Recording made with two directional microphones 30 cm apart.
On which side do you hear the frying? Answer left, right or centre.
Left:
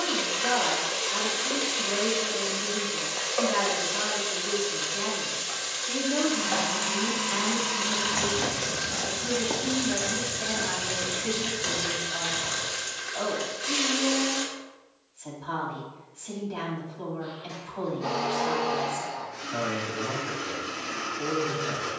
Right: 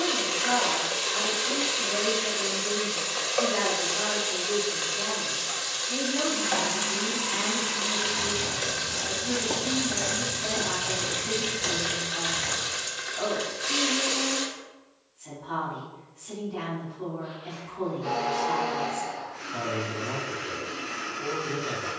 centre.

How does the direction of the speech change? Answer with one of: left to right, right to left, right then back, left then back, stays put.
stays put.